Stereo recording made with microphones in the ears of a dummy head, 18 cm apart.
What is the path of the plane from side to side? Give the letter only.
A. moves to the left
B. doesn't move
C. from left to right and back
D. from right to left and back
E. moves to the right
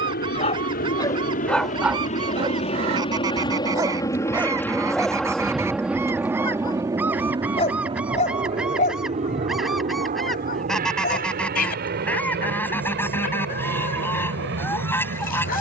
E.